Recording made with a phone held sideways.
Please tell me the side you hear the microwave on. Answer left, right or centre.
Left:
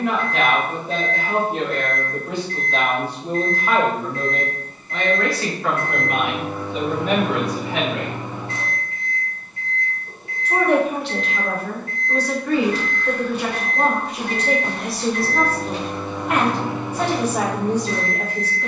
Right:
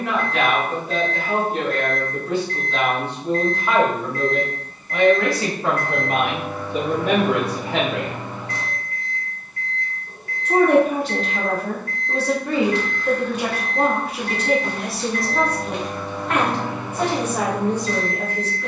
left.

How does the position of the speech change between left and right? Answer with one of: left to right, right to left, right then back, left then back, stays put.
right then back.